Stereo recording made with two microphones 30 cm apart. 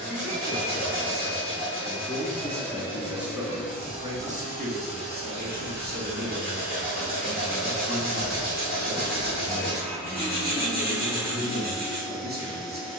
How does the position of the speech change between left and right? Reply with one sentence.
You can hear the speech move to the right.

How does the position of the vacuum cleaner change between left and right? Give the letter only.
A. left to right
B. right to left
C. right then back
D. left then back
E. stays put
E.